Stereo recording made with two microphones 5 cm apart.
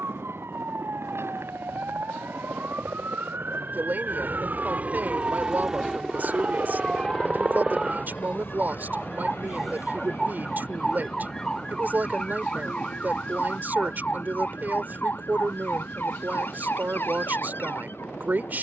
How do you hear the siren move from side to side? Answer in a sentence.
You can hear the siren travel towards the left.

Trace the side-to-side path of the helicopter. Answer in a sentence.
You can hear the helicopter move to the left.